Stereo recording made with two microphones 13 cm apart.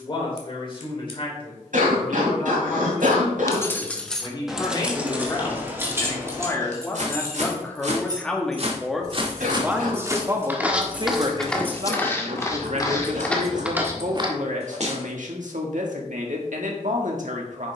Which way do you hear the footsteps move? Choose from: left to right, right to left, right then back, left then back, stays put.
left then back.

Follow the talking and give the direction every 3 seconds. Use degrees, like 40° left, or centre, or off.
40° left, 30° left, 10° left, 30° right, 70° right, 70° right.